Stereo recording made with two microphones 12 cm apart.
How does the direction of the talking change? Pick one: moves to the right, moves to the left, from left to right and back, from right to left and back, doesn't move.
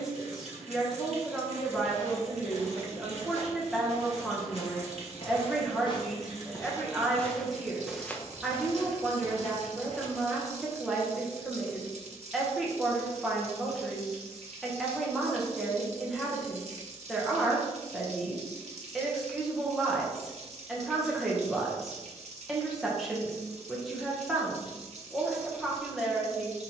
doesn't move.